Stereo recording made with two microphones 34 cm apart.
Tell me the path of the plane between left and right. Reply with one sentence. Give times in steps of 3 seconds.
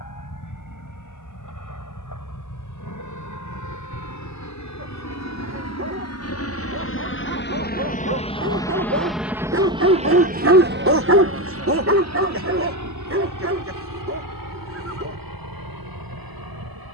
You can hear the plane on the left from 0 s and on the right from 9 s.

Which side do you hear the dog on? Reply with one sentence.
In this clip you hear the dog on the right.